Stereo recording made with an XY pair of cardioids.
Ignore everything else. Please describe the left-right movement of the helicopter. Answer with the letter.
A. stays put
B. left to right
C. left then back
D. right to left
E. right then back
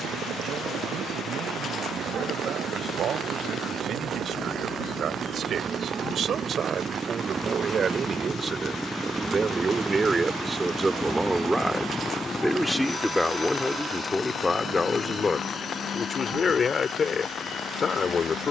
D.